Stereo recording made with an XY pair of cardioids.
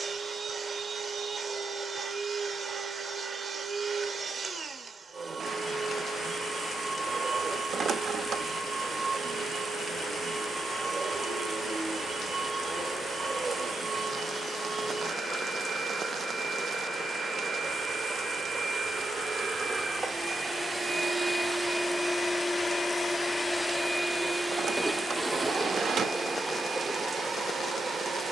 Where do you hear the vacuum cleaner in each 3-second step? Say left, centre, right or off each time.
right, right, right, right, right, right, right, centre, right, right.